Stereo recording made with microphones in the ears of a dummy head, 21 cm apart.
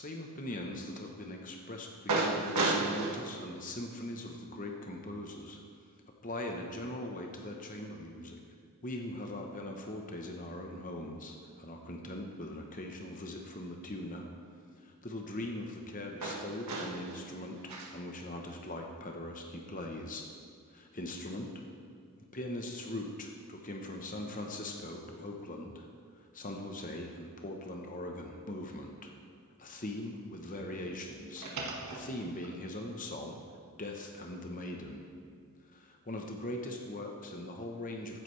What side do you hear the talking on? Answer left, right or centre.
left.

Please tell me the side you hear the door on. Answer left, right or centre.
right.